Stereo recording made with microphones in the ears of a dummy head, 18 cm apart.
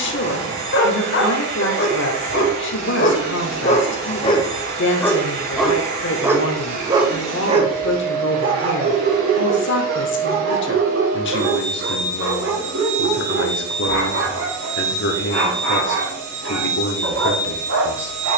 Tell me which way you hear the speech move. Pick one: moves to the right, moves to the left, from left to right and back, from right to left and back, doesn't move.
doesn't move.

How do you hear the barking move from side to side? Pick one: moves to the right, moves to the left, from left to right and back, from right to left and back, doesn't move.
moves to the right.